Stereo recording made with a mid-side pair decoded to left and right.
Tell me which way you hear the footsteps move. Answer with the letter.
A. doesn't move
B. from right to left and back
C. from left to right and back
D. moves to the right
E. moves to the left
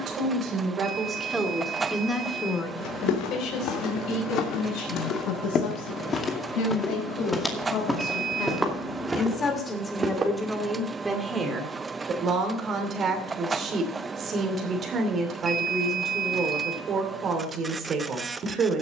D.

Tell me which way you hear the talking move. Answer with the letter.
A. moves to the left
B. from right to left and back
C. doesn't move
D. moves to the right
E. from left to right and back
B.